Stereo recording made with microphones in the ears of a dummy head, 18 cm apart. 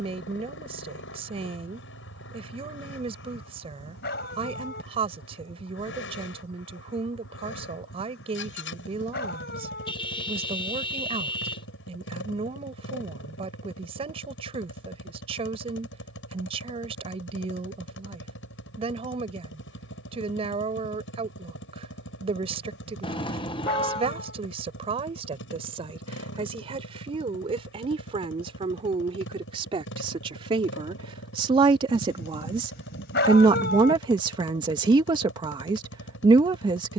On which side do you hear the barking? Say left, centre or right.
left.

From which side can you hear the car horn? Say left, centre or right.
left.